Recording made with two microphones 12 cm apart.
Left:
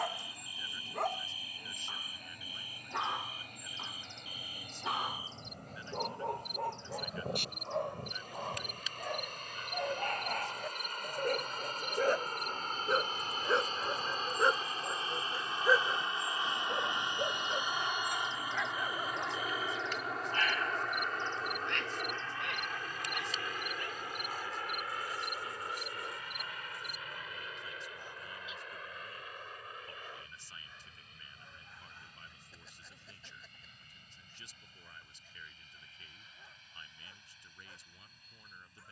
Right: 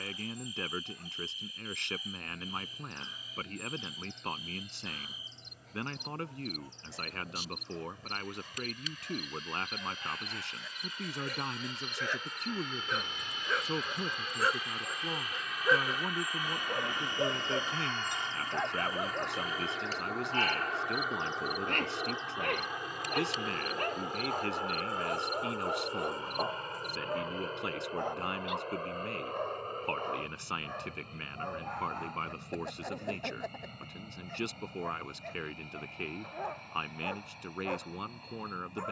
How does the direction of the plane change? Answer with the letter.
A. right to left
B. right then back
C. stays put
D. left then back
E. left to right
E.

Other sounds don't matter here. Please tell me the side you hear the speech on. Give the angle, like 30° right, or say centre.
80° right.